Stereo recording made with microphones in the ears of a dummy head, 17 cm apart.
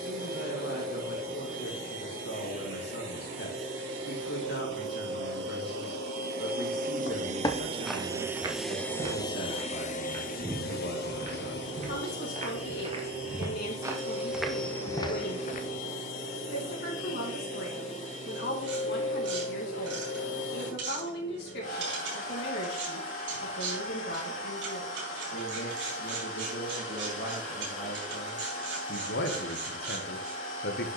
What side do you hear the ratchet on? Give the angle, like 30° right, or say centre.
70° right.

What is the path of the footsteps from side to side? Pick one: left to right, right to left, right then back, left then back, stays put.
right then back.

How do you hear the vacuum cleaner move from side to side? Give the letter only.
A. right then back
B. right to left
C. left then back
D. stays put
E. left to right
B.